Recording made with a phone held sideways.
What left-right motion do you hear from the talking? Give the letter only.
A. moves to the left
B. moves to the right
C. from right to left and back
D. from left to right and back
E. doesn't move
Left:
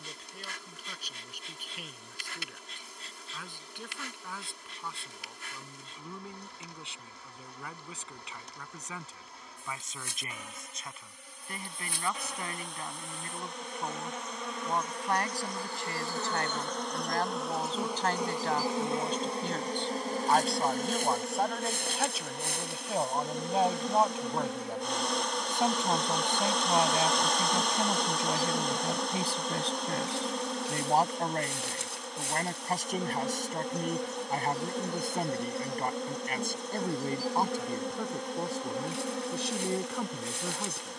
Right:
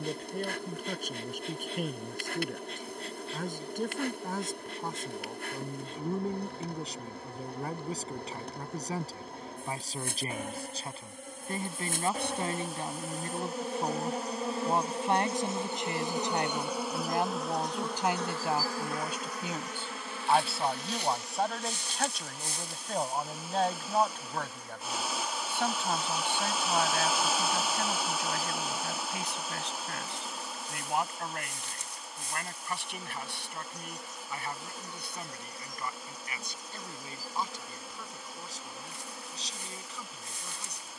A.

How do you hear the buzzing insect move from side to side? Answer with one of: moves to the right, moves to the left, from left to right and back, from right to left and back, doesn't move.
moves to the left.